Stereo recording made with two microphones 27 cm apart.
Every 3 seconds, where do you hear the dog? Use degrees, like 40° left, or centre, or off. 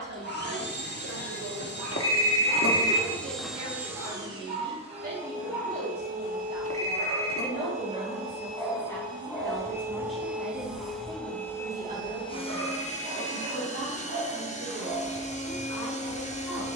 80° right, 80° right, 20° right, 20° right, 70° right, 80° right.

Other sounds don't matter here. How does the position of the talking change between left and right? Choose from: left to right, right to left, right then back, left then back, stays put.
left then back.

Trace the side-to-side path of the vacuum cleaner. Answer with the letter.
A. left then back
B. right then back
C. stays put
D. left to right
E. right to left
B.